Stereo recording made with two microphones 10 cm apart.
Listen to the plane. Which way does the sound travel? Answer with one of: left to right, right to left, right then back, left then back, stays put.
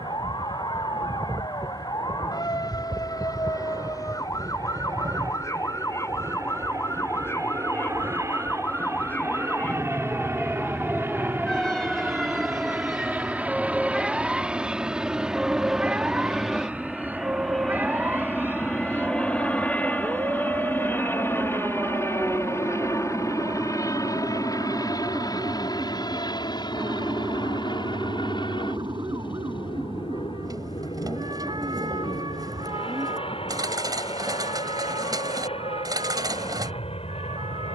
right to left.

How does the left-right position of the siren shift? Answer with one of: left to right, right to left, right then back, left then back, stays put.
left to right.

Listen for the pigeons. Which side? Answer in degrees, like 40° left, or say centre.
40° right.